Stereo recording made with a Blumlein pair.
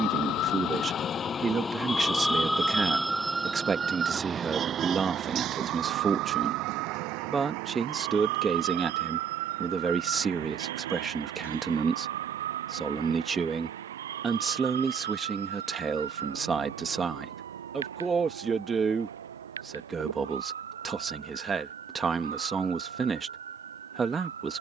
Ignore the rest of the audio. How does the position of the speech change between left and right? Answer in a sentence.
You can hear the speech stay put.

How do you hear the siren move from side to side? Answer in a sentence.
In this clip you hear the siren travel towards the right.